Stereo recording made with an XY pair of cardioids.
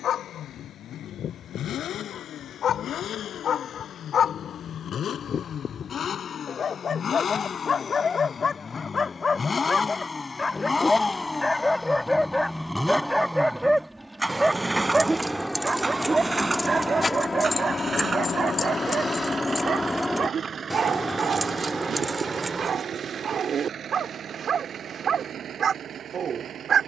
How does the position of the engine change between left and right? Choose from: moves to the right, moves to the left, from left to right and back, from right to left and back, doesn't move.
moves to the right.